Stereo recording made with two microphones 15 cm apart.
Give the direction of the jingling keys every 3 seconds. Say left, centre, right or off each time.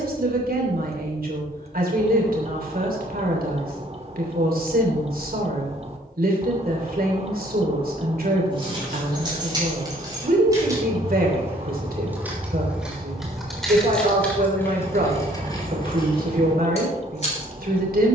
off, off, right, right, centre, left.